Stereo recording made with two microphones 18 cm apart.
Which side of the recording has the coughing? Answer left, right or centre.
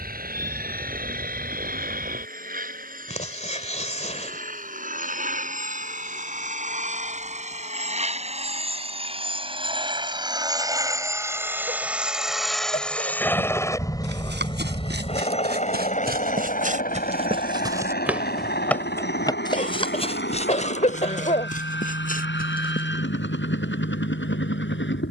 left.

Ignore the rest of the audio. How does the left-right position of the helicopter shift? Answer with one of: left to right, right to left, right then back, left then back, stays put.
right to left.